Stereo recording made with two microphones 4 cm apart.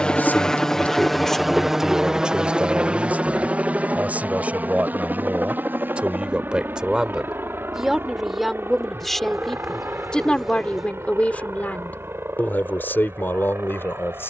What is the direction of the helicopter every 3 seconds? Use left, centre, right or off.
centre, right, right, right, right.